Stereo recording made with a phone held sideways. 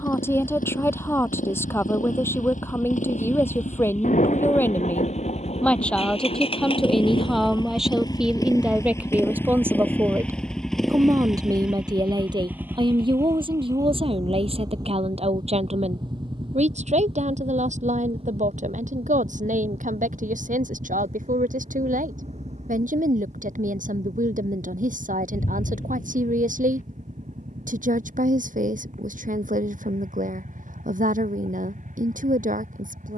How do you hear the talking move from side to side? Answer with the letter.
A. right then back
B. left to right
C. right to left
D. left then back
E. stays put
B.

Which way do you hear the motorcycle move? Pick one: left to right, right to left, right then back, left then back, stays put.
left to right.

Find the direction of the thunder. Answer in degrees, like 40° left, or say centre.
60° left.